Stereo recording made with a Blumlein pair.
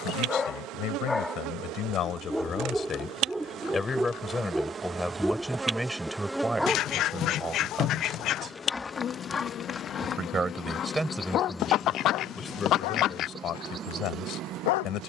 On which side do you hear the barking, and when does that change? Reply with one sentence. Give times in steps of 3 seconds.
In this clip you hear the barking in the centre from 0 s and on the left from 9 s.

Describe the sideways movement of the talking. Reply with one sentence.
In this clip you hear the talking move from left to right and back again.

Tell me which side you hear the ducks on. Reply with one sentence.
In this clip you hear the ducks on the left.